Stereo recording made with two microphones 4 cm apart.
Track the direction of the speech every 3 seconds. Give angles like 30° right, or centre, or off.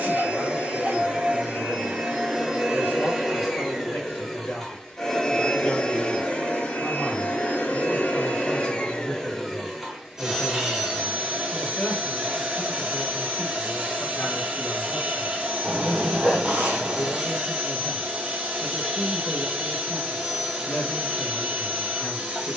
50° left, 50° left, 10° left, 10° left, 40° left, 40° left, 40° left, 40° left.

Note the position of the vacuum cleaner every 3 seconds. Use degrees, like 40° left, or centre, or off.
20° right, 10° left, 30° left, 10° right, 20° right, 20° right, 20° right, 20° right.